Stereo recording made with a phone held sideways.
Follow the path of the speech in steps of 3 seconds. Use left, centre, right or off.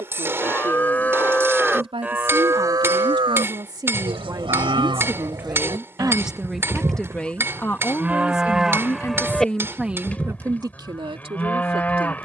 right, right, centre, right.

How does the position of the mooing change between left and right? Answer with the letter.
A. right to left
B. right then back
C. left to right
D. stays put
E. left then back
B.